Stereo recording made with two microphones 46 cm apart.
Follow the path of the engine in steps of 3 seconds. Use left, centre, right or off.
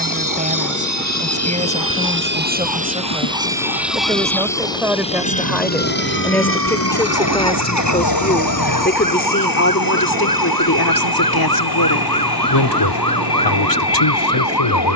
right, centre, left, left, left.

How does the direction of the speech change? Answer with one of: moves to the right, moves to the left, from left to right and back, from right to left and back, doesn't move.
moves to the left.